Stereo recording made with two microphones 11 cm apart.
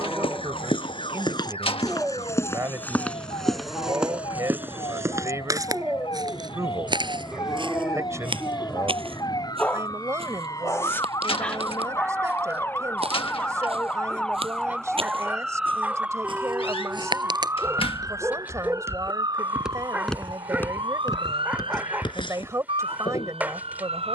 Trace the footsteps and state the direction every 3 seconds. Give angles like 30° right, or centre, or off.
40° left, 10° right, 50° right, 60° right, 60° right, 50° right, 10° right, 50° left.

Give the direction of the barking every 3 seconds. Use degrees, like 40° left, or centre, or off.
20° right, 20° right, centre, 20° left, 10° right, 20° right, 20° right, 20° right.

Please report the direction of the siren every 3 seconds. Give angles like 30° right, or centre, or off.
60° left, 50° left, 50° left, 30° left, 10° left, 10° right, 40° right, 60° right.